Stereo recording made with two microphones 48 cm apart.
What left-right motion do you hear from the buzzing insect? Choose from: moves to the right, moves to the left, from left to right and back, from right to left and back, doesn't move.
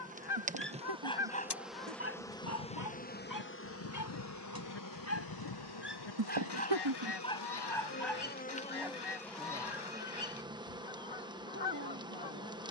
from right to left and back.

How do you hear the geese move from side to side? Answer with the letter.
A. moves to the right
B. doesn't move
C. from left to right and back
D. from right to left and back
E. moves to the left
B.